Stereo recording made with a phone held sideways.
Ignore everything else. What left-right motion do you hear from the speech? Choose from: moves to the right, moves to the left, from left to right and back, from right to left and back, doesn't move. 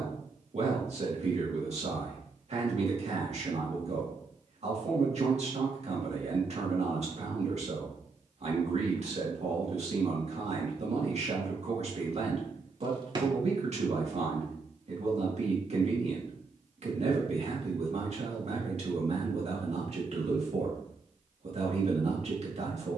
doesn't move.